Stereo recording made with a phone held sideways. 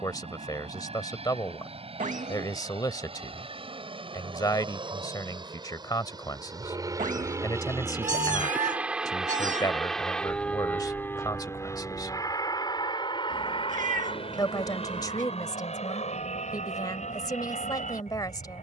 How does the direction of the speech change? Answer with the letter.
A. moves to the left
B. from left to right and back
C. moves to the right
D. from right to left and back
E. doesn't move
E.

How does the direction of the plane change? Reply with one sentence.
In this clip you hear the plane move to the left.